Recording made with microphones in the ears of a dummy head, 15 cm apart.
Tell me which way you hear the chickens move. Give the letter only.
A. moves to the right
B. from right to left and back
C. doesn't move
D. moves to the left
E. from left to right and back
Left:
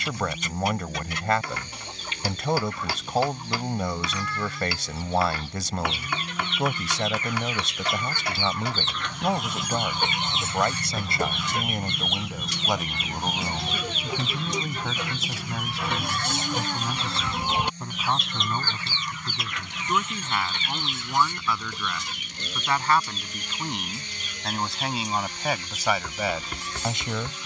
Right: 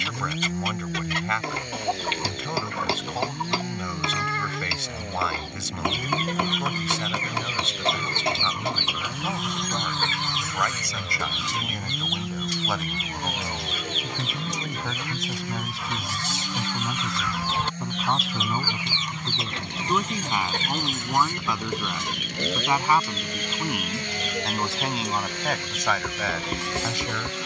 B.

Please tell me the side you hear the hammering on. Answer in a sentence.
In this clip you hear the hammering on the right.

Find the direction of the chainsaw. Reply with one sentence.
You can hear the chainsaw on the right.